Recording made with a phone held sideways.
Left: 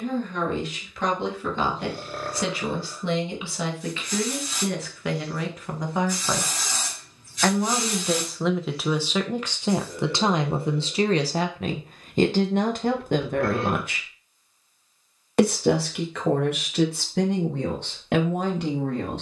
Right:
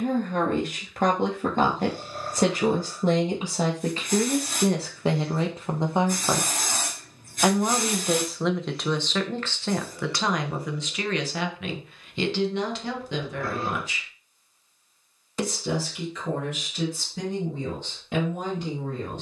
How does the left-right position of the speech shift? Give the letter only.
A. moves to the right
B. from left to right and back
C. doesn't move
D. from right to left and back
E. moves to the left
E.